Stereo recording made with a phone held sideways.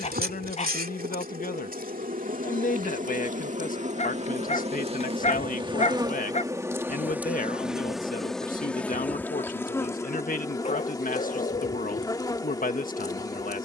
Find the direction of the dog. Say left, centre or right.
left.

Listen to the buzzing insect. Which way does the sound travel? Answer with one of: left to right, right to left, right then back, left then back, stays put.
right to left.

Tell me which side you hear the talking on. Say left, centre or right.
left.